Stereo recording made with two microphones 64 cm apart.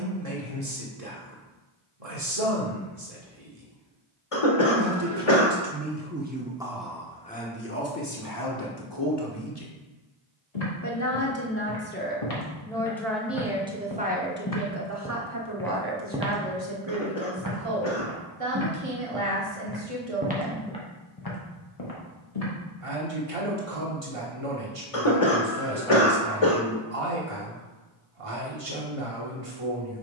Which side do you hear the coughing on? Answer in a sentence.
You can hear the coughing on the left.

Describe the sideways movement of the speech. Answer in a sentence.
In this clip you hear the speech go left and come back.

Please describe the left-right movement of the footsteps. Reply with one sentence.
You can hear the footsteps move from left to right and back again.